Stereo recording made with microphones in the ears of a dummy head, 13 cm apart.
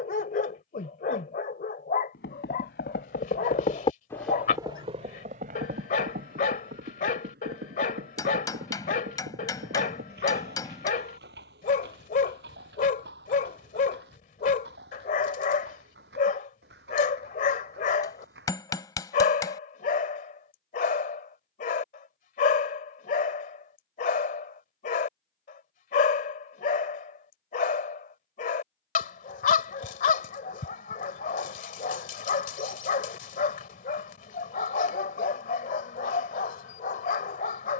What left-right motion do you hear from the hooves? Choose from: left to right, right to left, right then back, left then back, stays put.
left to right.